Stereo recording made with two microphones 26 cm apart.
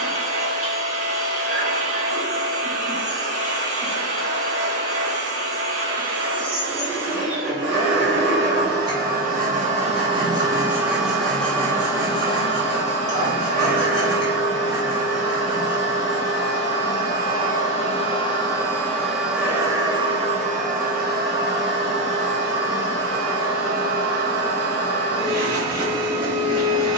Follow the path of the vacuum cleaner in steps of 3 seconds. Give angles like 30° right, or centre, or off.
60° right, 60° right, 50° right, 10° right, 40° left, 40° left, 10° right, 50° right, 60° right.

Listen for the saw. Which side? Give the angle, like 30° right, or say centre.
60° right.